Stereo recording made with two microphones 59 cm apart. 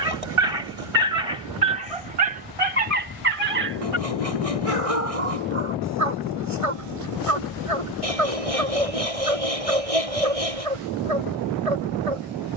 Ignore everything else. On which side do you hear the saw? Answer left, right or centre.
right.